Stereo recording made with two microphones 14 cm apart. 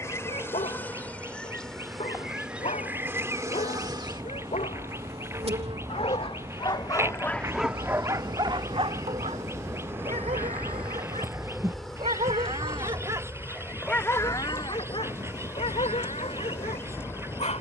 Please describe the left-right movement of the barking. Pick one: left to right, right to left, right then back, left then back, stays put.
right then back.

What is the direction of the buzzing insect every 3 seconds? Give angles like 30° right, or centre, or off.
10° left, 40° right, 40° right, 10° right, 10° left, 20° left.